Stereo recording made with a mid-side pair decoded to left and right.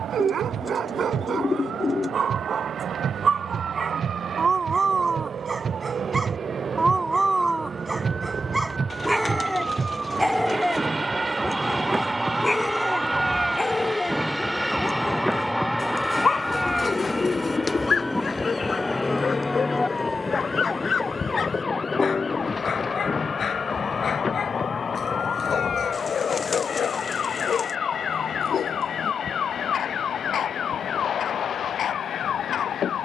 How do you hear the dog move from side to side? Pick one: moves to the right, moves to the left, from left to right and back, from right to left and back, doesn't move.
moves to the left.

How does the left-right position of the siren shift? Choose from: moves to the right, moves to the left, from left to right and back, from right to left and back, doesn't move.
moves to the left.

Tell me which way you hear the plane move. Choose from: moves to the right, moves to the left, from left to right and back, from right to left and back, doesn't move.
moves to the left.